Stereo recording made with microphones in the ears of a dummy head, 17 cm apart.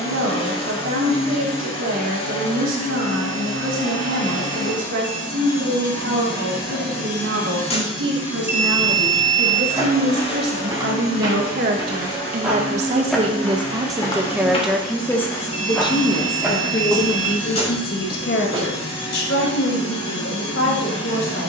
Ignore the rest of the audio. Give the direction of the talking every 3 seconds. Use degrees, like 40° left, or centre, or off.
80° right, 80° right, 70° right, 60° right, 20° right, 30° left, 60° left.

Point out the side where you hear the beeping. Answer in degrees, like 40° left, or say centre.
10° right.